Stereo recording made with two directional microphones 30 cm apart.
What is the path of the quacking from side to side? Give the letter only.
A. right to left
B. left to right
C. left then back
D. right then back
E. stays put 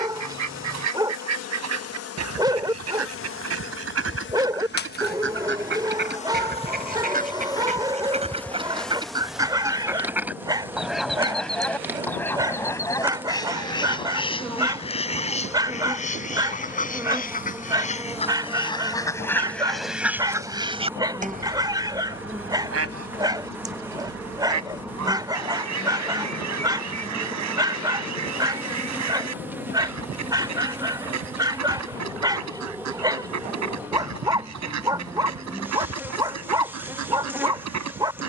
C.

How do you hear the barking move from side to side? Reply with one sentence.
In this clip you hear the barking stay put.